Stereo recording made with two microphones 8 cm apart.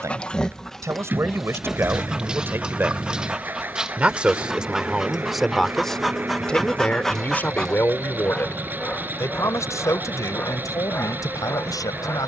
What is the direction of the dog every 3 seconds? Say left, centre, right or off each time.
centre, centre, centre, left.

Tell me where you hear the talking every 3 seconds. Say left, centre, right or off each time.
right, centre, left, left.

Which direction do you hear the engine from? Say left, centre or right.
right.